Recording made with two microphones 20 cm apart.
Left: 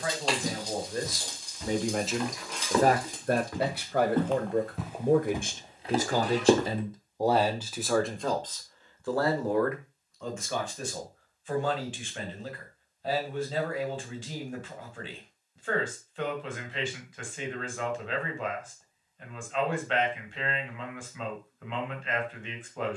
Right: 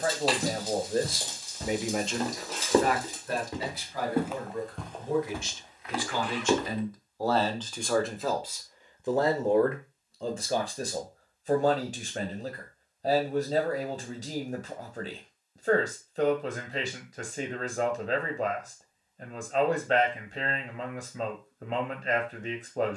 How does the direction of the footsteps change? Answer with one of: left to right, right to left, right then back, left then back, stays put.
right to left.